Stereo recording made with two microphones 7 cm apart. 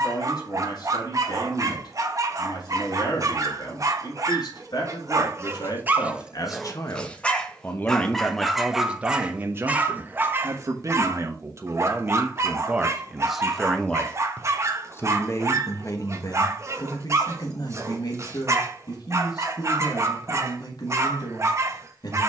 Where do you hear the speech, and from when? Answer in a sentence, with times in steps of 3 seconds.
You can hear the speech on the left from 0 s, on the right from 9 s, in the centre from 12 s and on the left from 15 s.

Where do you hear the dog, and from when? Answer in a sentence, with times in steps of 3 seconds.
You can hear the dog on the right from 0 s, in the centre from 6 s and on the right from 9 s.